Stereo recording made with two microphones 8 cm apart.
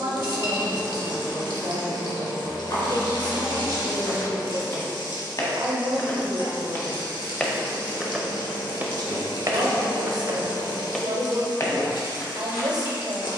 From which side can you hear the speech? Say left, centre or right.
right.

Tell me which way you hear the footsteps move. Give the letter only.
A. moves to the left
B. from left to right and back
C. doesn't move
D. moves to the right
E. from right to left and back
B.